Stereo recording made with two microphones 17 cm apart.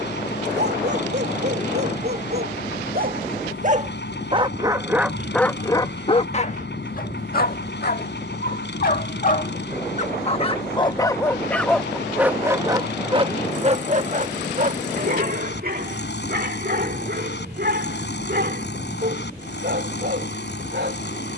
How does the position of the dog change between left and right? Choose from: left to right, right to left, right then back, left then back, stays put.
left then back.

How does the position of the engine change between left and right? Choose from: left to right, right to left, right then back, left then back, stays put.
stays put.